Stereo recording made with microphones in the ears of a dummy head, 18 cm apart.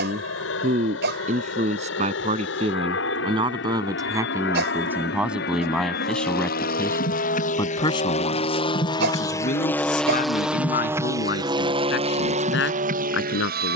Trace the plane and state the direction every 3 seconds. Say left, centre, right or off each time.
left, left, left, centre, right.